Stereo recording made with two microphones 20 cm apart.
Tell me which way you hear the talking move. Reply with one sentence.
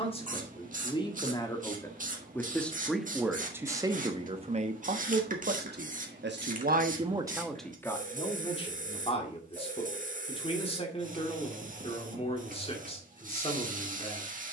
In this clip you hear the talking go right and come back.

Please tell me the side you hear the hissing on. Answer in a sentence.
You can hear the hissing on the right.